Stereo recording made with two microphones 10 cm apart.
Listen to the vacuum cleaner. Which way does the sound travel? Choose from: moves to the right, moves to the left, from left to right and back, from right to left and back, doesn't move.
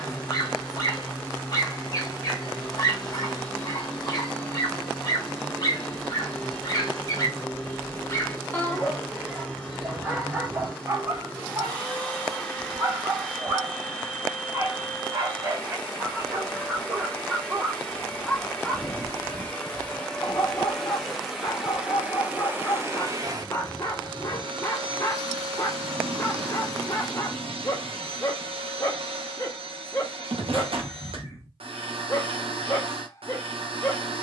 moves to the right.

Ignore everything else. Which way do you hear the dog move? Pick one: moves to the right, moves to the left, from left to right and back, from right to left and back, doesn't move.
from left to right and back.